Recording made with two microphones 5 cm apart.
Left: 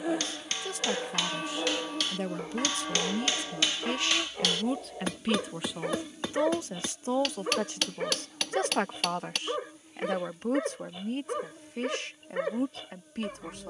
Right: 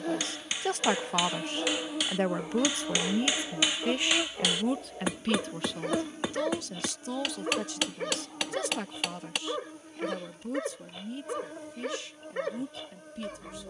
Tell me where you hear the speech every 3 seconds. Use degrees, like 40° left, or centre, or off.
50° right, 10° right, 40° left, 60° left, 60° left.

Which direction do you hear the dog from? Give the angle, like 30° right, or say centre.
10° left.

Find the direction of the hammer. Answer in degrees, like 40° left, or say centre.
10° right.